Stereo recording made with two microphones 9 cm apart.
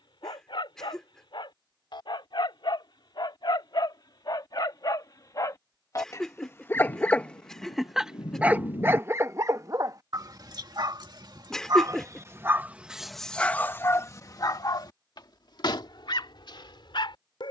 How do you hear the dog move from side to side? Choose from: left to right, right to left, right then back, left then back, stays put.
right then back.